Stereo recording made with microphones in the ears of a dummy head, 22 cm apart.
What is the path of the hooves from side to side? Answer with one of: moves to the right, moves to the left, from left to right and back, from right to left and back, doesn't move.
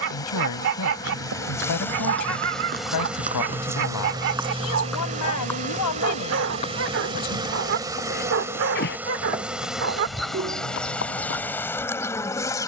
moves to the left.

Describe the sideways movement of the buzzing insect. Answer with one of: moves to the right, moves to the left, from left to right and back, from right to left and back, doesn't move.
from left to right and back.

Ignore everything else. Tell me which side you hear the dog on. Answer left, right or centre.
right.